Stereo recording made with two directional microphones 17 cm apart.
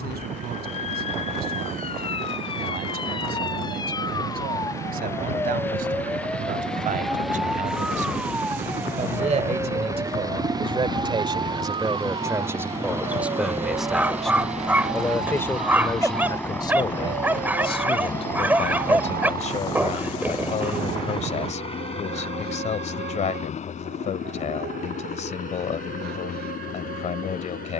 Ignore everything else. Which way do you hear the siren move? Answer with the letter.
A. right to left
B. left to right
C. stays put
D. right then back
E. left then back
B.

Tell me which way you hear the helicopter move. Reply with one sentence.
You can hear the helicopter move from right to left.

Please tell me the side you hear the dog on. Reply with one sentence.
In this clip you hear the dog in the centre.